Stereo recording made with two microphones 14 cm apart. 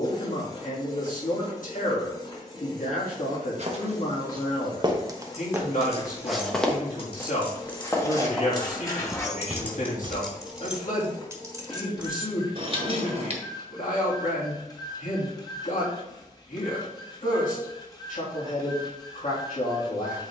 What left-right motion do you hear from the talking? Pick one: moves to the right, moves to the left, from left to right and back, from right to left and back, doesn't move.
doesn't move.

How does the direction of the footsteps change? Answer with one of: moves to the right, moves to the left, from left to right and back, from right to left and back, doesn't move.
from right to left and back.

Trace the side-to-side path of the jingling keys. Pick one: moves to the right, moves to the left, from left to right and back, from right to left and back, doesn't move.
moves to the right.